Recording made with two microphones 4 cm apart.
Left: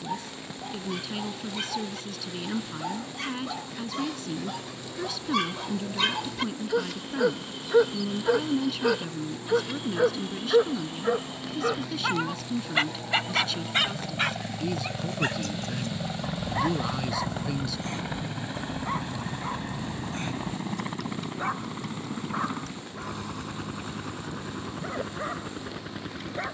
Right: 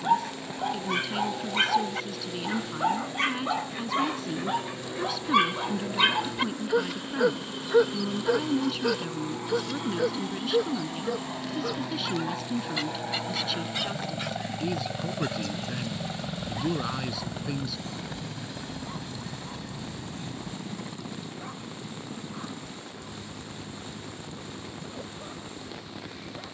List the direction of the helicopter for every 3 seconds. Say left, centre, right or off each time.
right, right, right, right, right, centre, left, left, left.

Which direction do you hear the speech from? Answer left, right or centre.
centre.